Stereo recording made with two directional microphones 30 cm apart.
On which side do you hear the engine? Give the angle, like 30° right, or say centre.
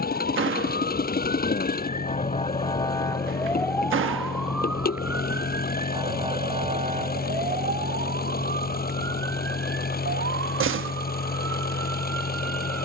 30° left.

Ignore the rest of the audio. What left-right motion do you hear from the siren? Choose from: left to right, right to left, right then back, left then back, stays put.
left to right.